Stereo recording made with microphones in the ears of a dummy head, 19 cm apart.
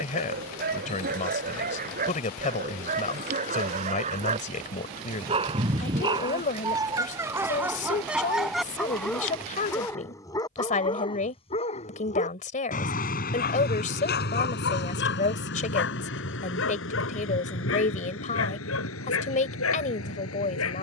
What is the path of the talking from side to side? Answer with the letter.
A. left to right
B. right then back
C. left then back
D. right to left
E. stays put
E.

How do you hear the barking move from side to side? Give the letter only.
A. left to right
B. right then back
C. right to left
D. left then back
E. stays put
C.